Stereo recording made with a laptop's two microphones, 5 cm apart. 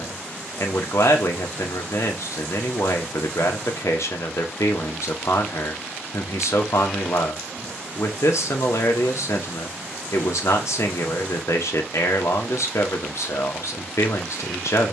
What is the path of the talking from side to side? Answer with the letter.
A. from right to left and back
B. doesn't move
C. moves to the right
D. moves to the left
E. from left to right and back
B.